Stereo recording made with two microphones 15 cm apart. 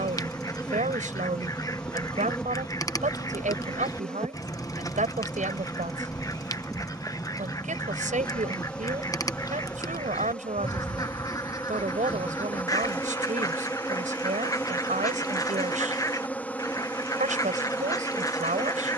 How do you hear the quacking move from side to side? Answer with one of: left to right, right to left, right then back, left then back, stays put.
stays put.